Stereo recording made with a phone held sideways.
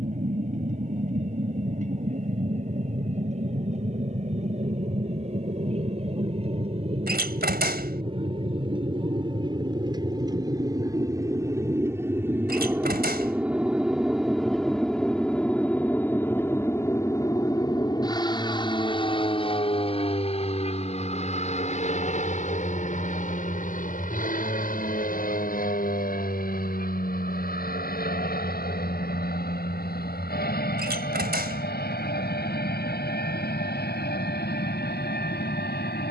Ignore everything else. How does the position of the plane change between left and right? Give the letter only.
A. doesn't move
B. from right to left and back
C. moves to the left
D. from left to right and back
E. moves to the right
C.